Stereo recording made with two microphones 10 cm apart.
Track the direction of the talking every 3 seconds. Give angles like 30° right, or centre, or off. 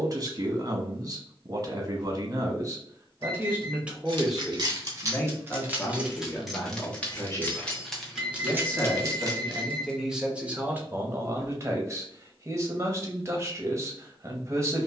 40° right, centre, 20° left, 10° right, 30° right.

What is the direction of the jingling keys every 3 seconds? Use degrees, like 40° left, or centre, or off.
off, 30° right, centre, 40° right, off.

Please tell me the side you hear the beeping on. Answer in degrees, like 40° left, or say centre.
70° left.